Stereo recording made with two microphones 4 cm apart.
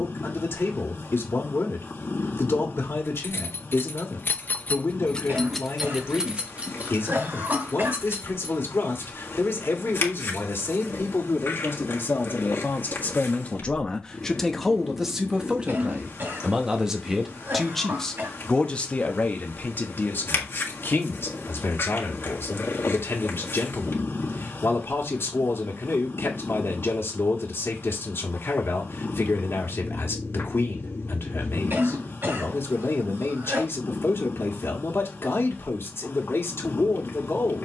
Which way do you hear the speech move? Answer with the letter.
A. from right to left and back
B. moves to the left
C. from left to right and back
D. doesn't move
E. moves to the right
C.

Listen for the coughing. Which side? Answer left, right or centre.
right.